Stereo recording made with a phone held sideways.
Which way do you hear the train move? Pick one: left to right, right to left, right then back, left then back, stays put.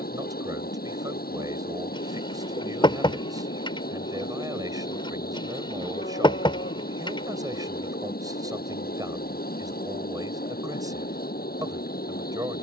stays put.